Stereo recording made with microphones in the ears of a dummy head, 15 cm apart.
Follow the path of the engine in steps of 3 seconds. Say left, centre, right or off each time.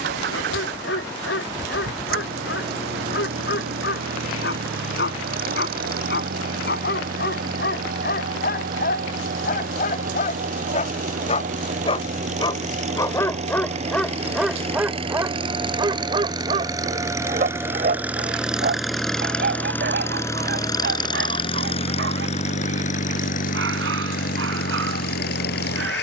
right, right, right, right, right, right, centre, left, left.